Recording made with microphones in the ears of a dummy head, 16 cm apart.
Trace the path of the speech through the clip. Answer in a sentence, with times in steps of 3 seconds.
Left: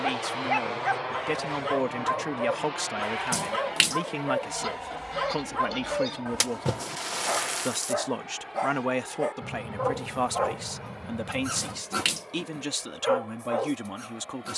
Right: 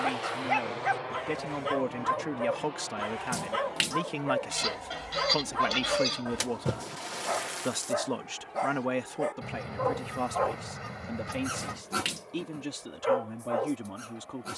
You can hear the speech on the left from 0 s, in the centre from 3 s and on the left from 9 s.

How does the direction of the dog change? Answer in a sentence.
You can hear the dog stay in one place.